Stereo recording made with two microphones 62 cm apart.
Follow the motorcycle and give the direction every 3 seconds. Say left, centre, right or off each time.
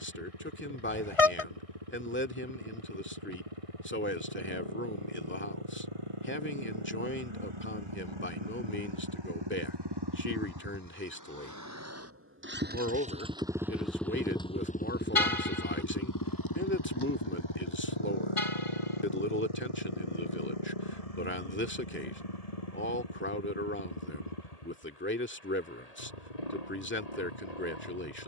right, right, right, right, centre, left, left, left, left, left.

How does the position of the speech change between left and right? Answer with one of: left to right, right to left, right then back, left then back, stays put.
stays put.